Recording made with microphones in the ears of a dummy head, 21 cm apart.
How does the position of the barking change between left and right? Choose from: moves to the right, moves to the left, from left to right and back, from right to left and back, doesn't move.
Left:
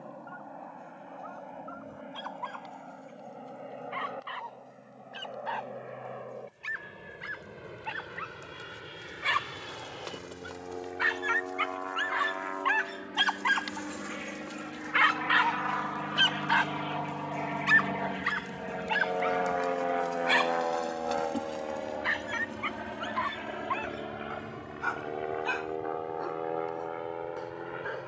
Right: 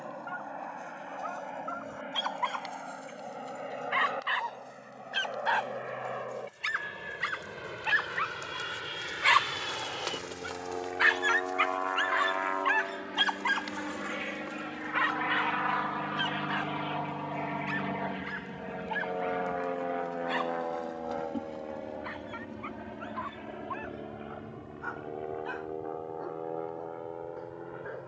moves to the left.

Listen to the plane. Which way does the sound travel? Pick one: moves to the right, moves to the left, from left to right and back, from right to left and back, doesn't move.
moves to the left.